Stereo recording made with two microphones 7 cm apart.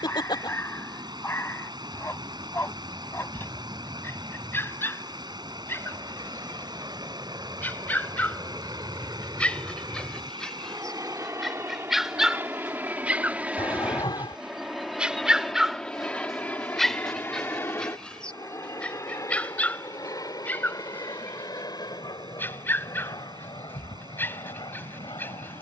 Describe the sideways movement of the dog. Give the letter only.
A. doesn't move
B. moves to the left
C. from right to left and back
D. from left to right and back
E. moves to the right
D.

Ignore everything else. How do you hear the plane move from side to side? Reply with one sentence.
You can hear the plane go from the right side to the left.